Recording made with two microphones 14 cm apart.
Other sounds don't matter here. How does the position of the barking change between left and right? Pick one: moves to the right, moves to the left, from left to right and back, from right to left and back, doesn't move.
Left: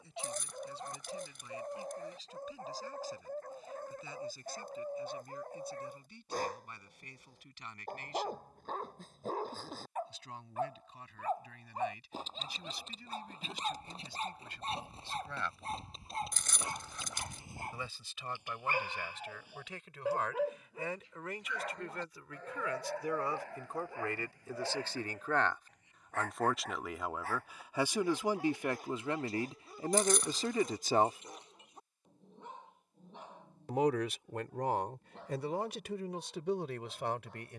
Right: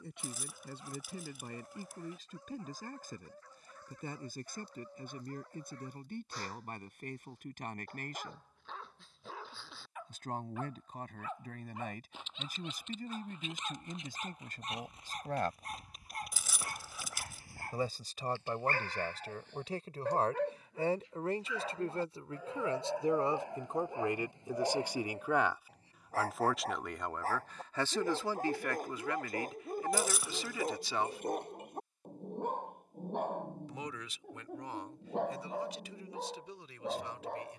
moves to the right.